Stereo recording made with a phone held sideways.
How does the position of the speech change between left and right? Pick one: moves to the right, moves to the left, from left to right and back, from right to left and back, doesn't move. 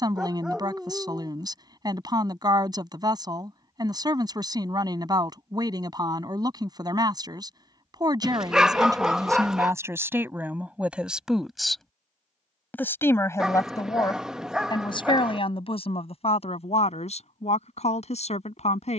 moves to the left.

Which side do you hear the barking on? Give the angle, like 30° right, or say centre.
centre.